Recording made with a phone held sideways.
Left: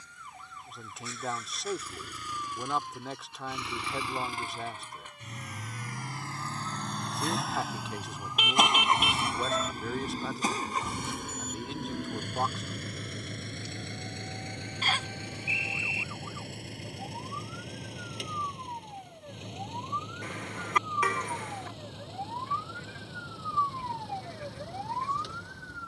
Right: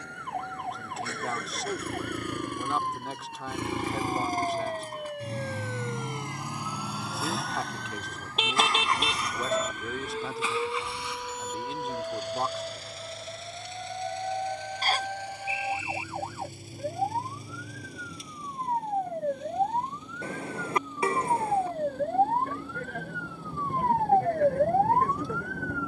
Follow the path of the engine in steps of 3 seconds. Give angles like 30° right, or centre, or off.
60° right, 40° right, centre, 40° left, 60° left, 70° left, 70° left, 80° left, 80° left.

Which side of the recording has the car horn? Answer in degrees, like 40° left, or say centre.
30° right.